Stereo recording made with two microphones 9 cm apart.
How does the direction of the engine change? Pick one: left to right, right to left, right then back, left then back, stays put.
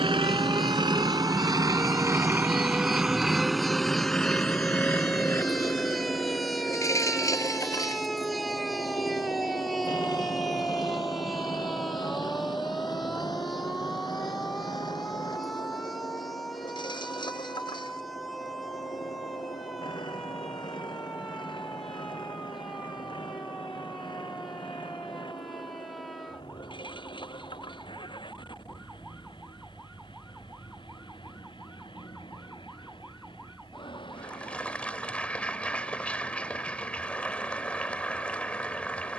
right to left.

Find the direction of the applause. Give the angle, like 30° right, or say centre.
10° left.